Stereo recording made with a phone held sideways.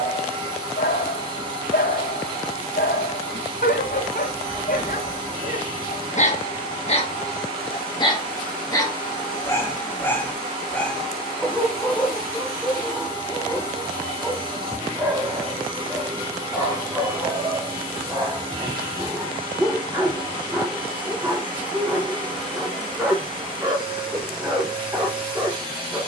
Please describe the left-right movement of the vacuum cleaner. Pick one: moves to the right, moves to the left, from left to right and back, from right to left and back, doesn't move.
doesn't move.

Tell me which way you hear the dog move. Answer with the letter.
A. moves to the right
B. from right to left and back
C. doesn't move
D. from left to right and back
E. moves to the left
A.